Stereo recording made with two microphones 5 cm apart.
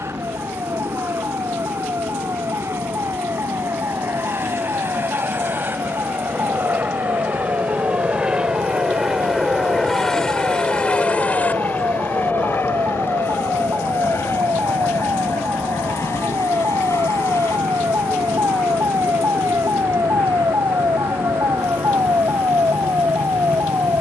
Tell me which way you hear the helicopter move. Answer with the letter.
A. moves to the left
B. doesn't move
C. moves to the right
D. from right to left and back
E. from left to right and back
A.